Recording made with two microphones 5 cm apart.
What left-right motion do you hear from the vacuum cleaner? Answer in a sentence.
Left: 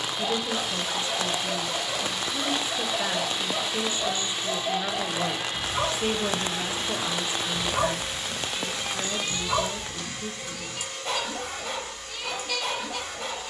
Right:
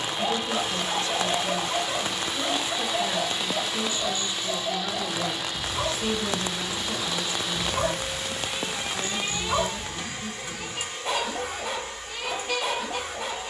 In this clip you hear the vacuum cleaner move from right to left and back again.